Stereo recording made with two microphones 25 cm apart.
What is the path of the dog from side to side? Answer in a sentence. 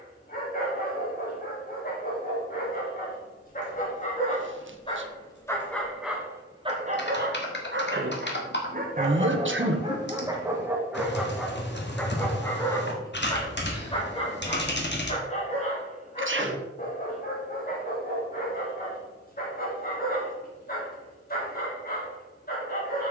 In this clip you hear the dog go right and come back.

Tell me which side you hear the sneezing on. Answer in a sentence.
You can hear the sneezing on the right.